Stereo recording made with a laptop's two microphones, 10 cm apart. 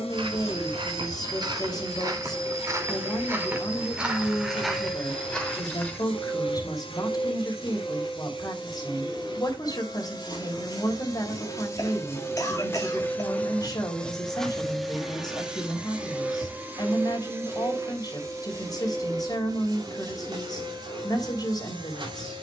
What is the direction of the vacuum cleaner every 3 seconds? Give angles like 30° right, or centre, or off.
70° left, 70° left, 60° left, 40° left, 10° left, 20° right, 40° right, 50° right.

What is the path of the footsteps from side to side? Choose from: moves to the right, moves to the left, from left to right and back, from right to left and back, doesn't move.
moves to the left.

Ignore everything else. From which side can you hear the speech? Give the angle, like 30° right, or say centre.
40° left.